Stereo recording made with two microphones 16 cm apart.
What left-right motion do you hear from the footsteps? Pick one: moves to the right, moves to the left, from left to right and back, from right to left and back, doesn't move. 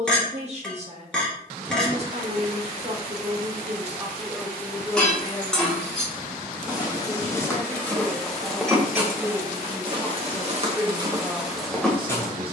from left to right and back.